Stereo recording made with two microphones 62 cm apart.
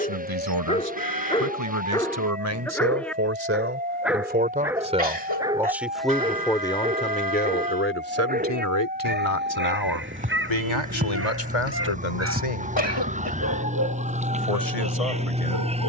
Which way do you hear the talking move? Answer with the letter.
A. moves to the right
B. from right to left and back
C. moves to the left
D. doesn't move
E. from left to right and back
C.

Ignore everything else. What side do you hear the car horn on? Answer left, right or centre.
right.